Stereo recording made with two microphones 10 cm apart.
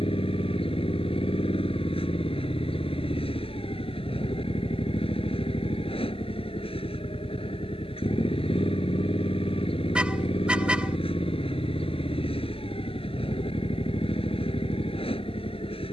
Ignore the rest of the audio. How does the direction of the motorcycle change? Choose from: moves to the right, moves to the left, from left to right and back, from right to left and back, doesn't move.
doesn't move.